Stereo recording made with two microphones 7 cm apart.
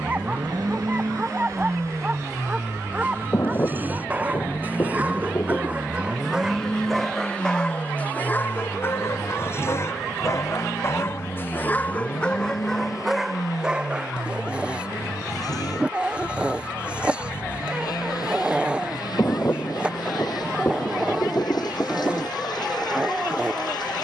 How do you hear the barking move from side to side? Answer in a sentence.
In this clip you hear the barking move from right to left and back again.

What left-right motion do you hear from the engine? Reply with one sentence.
In this clip you hear the engine go from the right side to the left.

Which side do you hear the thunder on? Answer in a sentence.
You can hear the thunder on the left.